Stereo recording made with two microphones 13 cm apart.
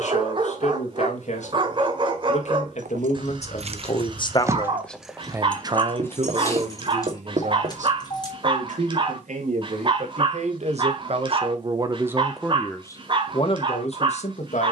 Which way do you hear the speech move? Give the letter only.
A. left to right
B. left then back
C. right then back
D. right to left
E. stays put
C.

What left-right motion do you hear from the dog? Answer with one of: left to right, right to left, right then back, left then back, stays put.
stays put.